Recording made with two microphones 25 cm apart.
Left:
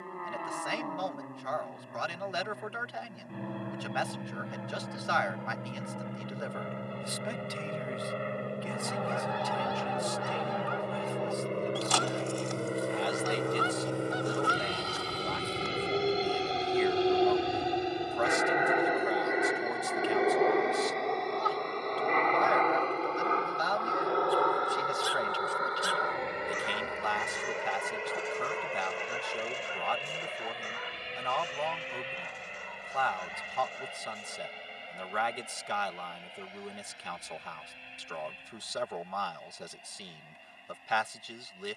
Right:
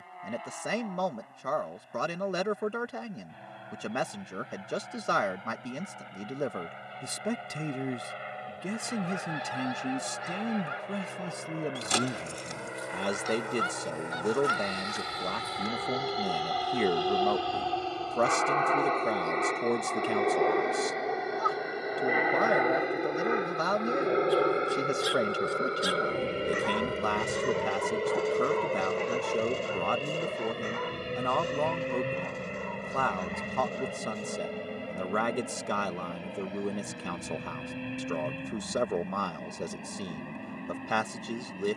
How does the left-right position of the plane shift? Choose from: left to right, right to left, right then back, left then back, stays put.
left to right.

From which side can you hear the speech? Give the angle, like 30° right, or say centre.
50° right.